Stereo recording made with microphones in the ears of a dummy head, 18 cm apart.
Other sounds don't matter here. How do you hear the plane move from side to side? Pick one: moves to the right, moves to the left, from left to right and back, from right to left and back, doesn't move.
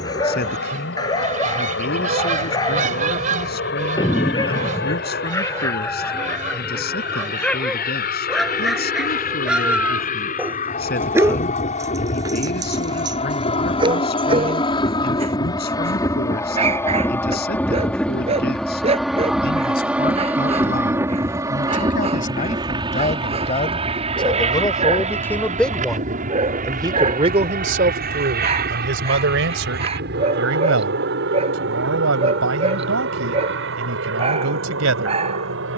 moves to the right.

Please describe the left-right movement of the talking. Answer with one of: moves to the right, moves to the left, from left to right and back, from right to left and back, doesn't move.
moves to the right.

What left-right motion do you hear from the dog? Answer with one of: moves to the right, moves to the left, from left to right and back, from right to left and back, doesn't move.
moves to the right.